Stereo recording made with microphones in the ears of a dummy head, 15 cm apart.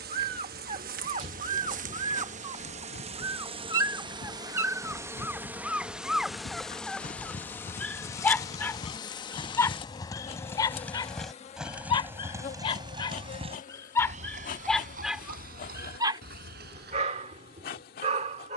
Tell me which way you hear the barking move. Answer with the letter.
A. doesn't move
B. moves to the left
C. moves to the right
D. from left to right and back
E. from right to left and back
E.